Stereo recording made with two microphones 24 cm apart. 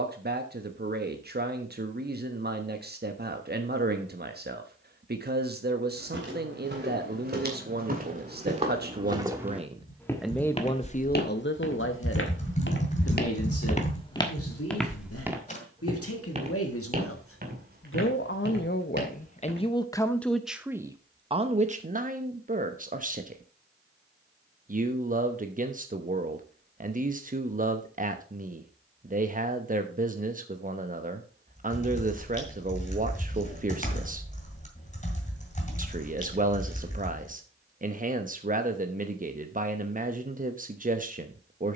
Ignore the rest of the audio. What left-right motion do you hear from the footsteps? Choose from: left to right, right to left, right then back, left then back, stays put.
left then back.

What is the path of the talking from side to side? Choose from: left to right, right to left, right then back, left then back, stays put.
left then back.